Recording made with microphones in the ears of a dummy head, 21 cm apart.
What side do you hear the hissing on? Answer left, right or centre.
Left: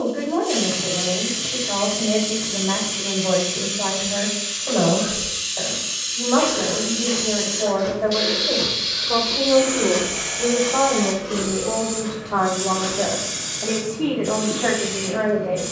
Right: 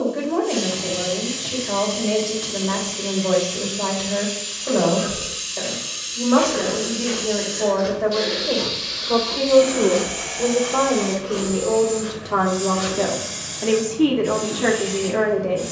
left.